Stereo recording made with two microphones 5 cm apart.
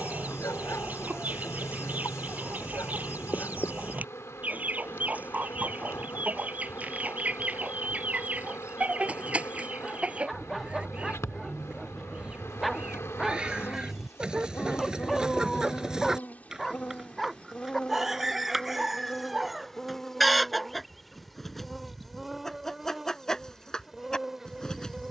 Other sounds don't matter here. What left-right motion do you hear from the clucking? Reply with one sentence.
In this clip you hear the clucking travel towards the left.